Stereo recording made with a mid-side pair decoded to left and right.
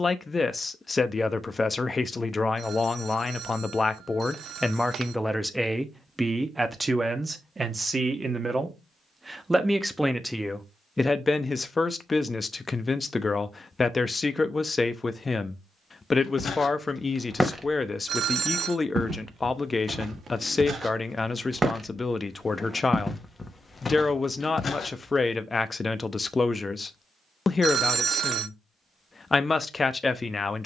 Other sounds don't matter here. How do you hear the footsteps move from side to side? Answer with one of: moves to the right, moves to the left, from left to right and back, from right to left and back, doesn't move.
from left to right and back.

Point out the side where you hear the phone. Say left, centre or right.
right.